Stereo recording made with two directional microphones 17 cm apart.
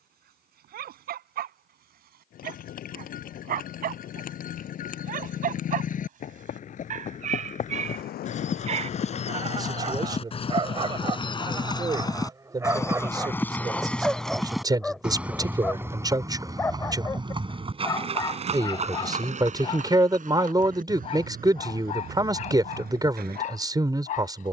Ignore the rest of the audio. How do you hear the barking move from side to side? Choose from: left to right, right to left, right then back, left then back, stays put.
right to left.